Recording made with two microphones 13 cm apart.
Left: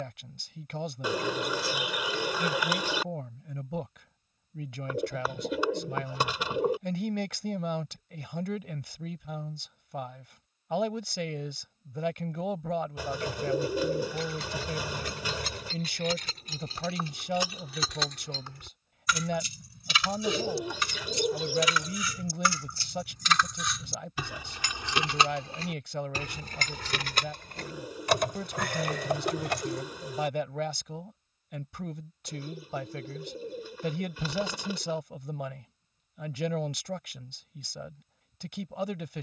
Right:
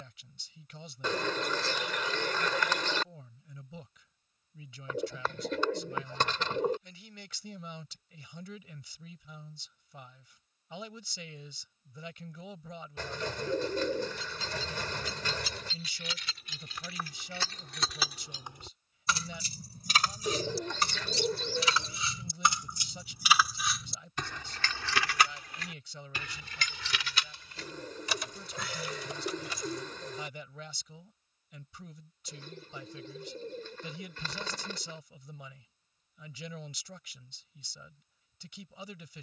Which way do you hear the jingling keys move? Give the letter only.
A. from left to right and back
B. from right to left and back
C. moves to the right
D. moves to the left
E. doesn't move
A.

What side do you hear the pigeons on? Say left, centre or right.
centre.